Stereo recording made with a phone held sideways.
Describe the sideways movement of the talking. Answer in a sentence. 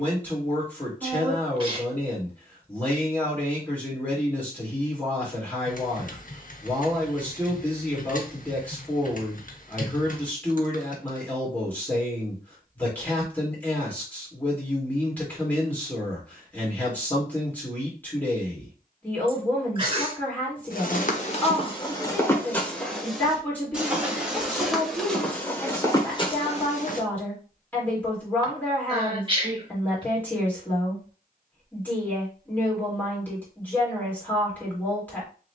You can hear the talking stay in one place.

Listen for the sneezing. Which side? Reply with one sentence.
In this clip you hear the sneezing on the right.